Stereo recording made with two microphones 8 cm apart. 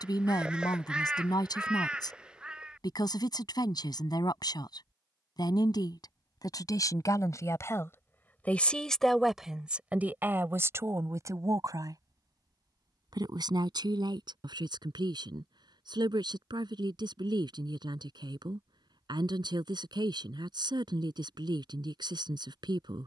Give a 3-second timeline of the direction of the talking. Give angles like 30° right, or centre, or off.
60° left, 60° left, 40° left, 30° right, 60° right, 70° right, 70° right, 70° right.